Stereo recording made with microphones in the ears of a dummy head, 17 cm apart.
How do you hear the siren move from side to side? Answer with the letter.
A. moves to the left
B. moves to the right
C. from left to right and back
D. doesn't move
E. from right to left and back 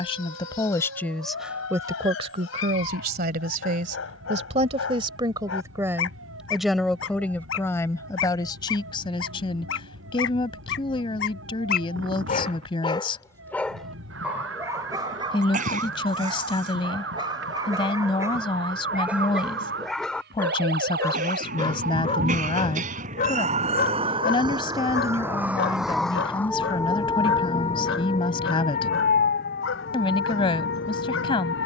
A.